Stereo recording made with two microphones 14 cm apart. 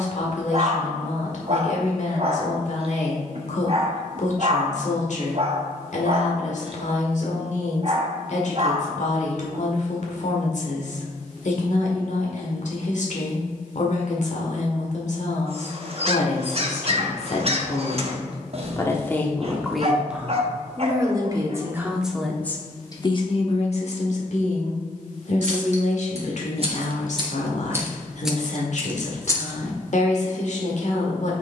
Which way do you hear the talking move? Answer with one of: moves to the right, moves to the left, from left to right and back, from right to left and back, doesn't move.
from left to right and back.